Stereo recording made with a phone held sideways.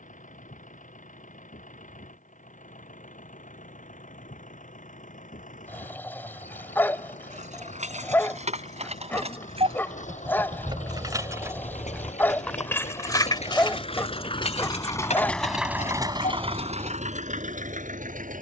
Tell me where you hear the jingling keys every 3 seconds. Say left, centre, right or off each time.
off, off, right, right, left, left.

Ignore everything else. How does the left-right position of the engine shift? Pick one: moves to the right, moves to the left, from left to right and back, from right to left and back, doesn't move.
moves to the right.